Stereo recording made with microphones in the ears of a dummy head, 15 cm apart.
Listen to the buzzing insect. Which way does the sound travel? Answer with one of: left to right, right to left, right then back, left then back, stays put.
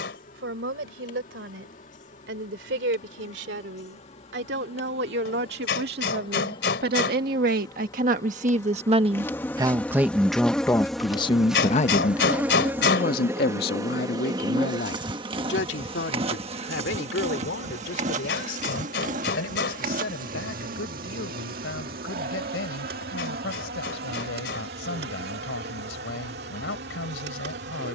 left to right.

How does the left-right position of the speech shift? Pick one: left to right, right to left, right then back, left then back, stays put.
right to left.